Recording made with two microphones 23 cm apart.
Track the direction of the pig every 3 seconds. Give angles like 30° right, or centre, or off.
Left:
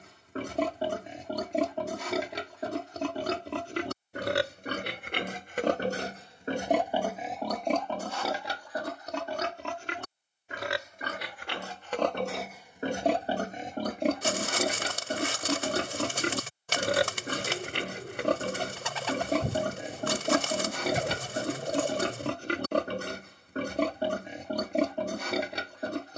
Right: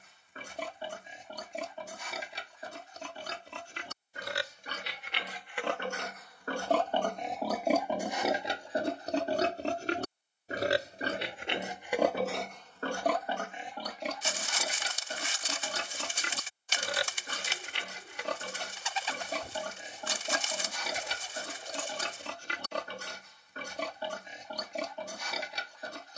70° left, 60° left, centre, 30° right, 30° left, 60° left, 60° left, 60° left, 60° left.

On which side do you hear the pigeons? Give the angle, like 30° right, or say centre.
60° left.